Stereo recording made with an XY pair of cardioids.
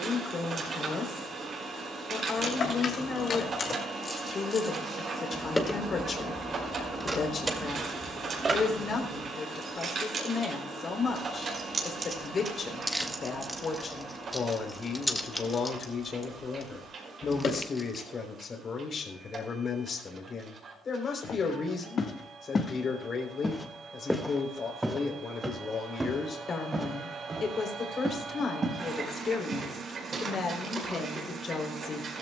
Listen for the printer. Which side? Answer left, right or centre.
right.